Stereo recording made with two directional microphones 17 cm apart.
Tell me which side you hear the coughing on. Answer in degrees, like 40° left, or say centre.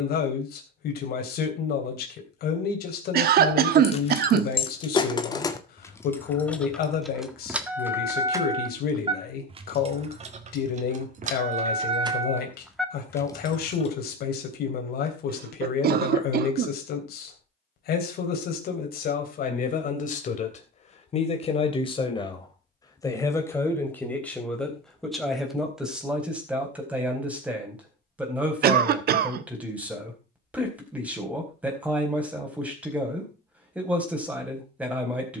60° right.